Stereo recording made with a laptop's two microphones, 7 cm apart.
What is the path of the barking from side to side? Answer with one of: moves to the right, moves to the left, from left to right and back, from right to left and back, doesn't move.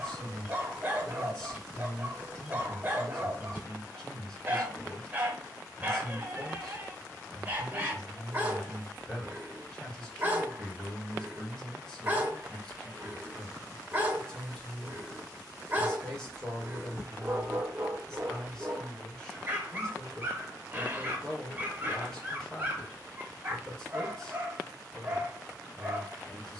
doesn't move.